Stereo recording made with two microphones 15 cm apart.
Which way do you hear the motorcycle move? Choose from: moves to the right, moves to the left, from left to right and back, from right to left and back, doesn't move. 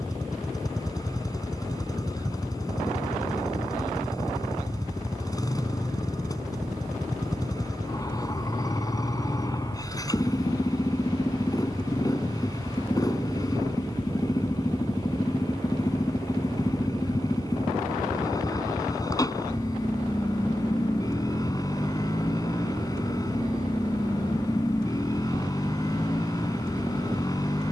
doesn't move.